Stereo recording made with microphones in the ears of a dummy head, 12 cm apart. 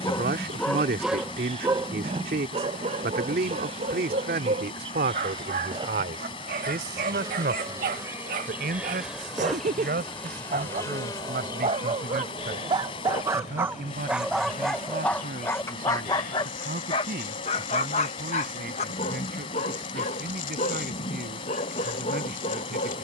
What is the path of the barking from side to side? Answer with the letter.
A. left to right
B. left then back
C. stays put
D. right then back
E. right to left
D.